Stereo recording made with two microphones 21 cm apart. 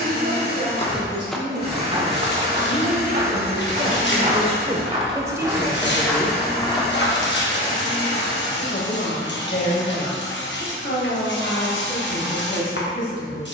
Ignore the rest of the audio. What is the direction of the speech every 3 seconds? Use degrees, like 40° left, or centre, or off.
60° right, 30° right, 30° left, 60° left, 70° left.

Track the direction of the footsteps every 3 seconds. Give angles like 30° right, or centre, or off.
10° right, 30° right, 20° left, off, off.